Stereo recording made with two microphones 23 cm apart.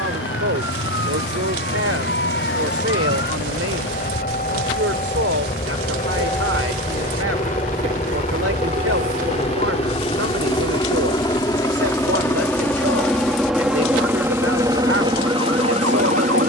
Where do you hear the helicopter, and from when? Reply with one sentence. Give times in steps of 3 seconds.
You can hear the helicopter on the left from 0 s, in the centre from 12 s and on the right from 15 s.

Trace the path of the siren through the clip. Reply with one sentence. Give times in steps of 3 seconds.
In this clip you hear the siren on the left from 0 s, in the centre from 6 s and on the right from 9 s.